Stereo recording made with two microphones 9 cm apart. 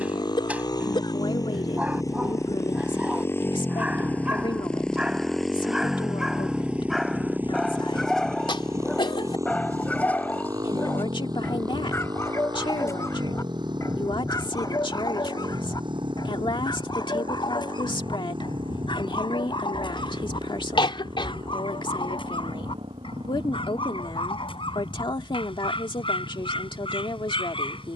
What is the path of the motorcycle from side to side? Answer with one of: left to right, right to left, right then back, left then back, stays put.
left to right.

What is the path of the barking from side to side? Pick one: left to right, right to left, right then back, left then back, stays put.
right to left.